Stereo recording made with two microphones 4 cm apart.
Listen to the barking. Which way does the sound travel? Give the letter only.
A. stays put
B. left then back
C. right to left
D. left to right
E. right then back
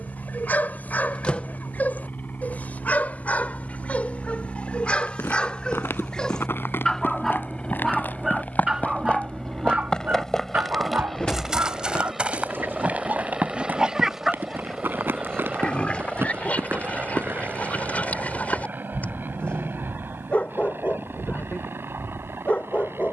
E.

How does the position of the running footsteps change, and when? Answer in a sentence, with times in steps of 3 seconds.
In this clip you hear the running footsteps not at all from 0 s, on the left from 3 s, in the centre from 9 s, on the right from 12 s and not at all from 18 s.